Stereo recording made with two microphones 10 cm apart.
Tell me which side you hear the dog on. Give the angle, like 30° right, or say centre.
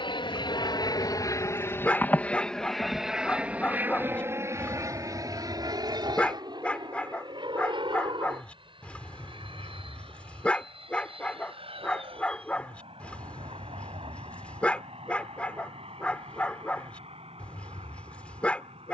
10° left.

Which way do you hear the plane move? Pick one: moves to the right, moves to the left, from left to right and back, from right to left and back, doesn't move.
moves to the right.